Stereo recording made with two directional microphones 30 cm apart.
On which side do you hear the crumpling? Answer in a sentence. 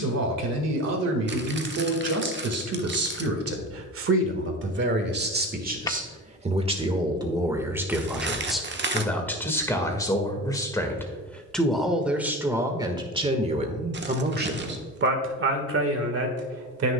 You can hear the crumpling on the right.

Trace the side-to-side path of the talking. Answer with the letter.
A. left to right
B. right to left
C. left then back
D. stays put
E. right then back
C.